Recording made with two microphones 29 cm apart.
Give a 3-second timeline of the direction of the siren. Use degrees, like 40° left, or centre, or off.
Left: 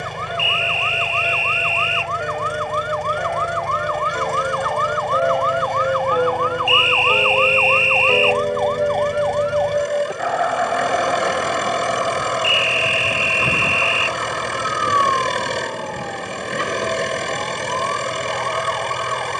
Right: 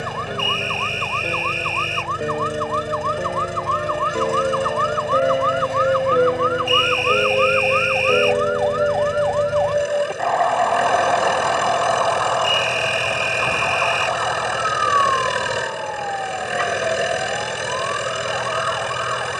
50° right, 40° right, 10° right, 10° left, 30° left, 40° left, 50° left.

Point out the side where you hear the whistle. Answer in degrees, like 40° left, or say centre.
50° right.